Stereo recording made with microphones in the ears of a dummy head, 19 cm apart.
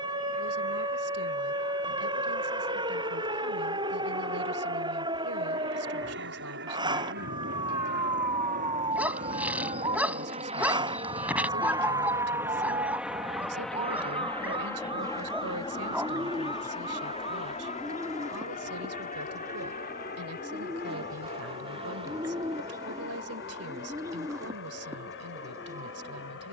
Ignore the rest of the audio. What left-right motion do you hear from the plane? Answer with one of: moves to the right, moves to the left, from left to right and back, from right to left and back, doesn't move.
moves to the left.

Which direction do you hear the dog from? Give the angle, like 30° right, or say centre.
10° right.